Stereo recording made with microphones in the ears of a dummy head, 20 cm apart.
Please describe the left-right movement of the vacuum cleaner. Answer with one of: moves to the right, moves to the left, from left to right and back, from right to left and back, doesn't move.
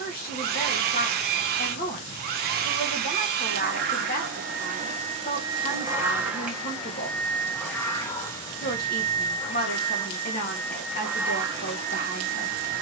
from right to left and back.